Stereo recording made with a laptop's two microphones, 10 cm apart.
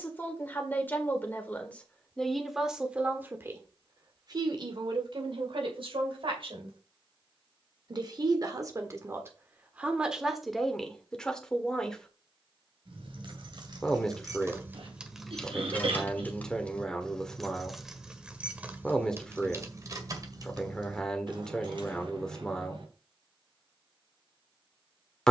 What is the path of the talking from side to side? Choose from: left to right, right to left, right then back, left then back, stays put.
right then back.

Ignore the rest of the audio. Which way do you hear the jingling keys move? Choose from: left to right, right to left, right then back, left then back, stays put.
left then back.